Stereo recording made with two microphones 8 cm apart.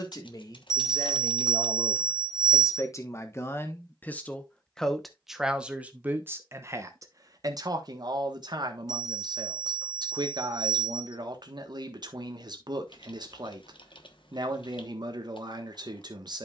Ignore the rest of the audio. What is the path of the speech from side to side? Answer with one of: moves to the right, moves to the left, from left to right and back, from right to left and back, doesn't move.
moves to the right.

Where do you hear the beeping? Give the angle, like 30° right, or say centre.
30° left.